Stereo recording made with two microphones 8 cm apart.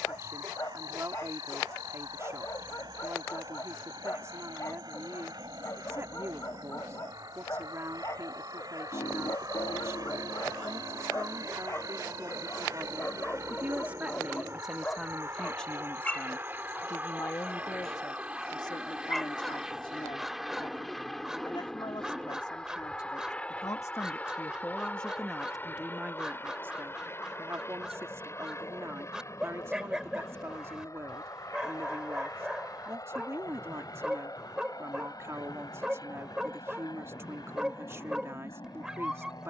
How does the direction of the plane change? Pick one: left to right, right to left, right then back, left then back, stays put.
right to left.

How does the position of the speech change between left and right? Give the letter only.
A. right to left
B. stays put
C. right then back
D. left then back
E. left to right
D.